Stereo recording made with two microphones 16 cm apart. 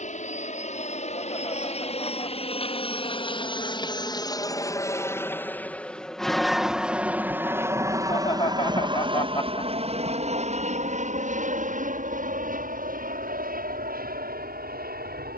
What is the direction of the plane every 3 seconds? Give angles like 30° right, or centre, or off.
50° left, 20° left, 10° right, 40° right, 60° right.